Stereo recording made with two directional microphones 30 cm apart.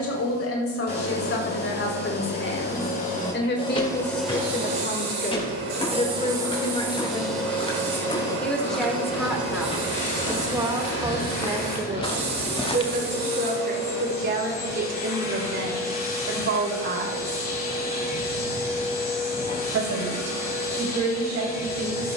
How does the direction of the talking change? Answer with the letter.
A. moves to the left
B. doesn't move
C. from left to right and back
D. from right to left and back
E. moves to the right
E.